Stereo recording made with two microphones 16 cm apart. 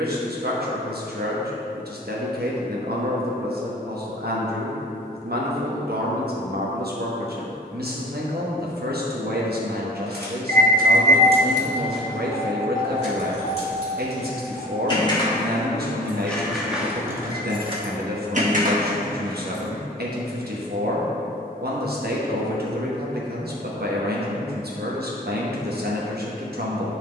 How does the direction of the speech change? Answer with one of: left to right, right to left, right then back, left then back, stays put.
stays put.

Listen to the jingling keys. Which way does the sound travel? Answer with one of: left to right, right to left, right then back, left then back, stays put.
left then back.